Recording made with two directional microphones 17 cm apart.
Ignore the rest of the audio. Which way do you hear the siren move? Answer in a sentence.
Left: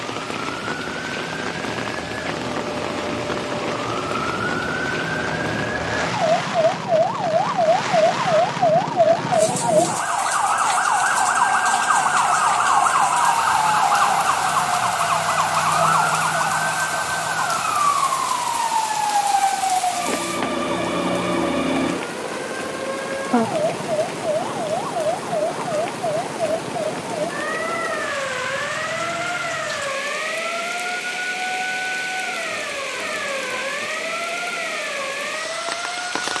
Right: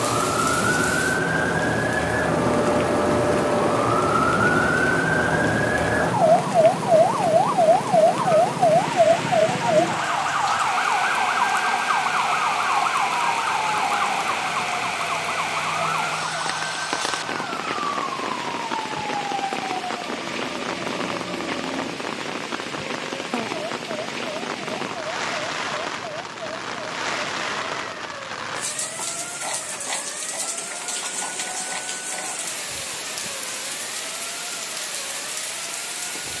You can hear the siren move to the left.